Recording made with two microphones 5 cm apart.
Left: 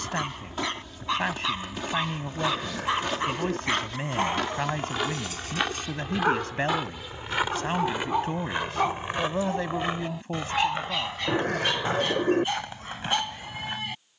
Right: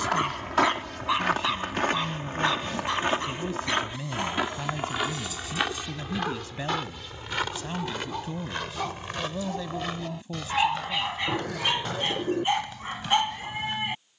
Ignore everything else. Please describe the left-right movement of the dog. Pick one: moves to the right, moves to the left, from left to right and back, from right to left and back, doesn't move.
from right to left and back.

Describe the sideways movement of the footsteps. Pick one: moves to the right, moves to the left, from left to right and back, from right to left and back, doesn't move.
moves to the left.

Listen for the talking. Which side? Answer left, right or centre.
left.